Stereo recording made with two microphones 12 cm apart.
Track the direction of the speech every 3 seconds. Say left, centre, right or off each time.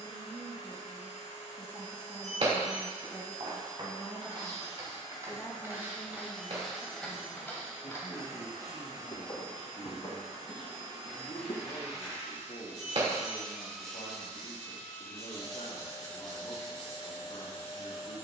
right, centre, left, left, left, left.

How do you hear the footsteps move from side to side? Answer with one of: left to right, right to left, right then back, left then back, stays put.
right to left.